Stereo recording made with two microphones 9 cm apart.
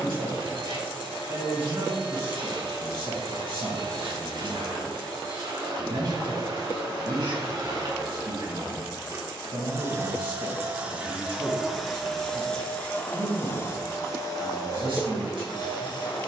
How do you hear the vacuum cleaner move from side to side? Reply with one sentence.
You can hear the vacuum cleaner go from the right side to the left.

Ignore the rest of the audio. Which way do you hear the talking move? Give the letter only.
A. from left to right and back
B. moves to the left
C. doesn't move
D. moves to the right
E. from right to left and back
C.